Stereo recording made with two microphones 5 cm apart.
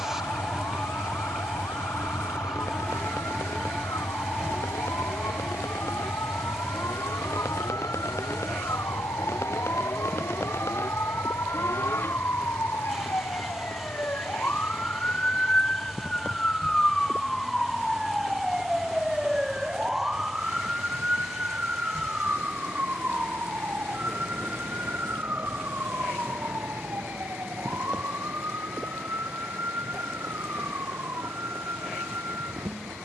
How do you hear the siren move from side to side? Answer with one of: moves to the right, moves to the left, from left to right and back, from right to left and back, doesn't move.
moves to the right.